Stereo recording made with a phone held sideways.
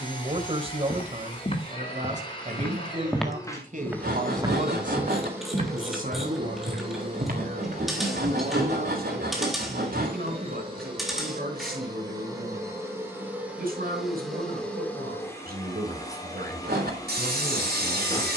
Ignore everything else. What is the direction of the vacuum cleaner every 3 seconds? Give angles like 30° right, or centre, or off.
30° left, centre, 40° right, 30° right, 10° right, 20° left.